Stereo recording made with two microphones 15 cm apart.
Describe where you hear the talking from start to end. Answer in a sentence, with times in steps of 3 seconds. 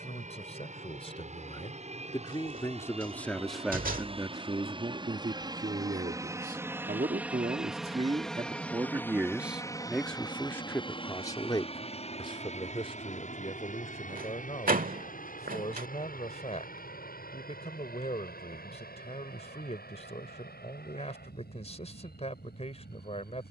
In this clip you hear the talking on the left from 0 s, on the right from 3 s, in the centre from 9 s and on the left from 12 s.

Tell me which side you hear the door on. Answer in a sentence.
In this clip you hear the door on the right.